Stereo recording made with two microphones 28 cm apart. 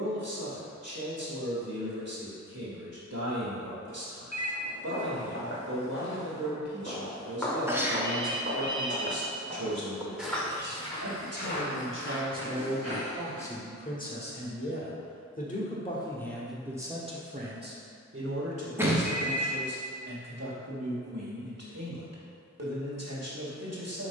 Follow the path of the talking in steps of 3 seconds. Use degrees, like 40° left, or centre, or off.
60° right, 60° right, 60° right, 60° right, 10° left, centre, 60° right, 60° right.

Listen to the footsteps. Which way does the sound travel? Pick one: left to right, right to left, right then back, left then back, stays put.
right then back.